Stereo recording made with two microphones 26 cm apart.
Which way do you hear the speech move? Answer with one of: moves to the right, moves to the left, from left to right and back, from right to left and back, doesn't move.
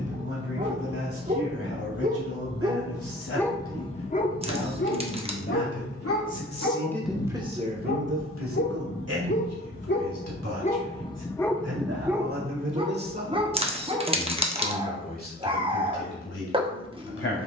from left to right and back.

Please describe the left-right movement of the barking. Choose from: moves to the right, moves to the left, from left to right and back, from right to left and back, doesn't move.
from right to left and back.